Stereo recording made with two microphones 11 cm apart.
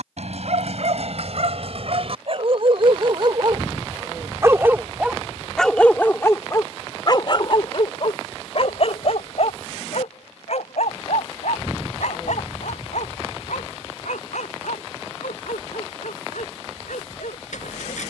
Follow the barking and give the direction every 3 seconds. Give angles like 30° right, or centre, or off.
60° right, 20° right, 40° left, 70° left, 80° left, 80° left.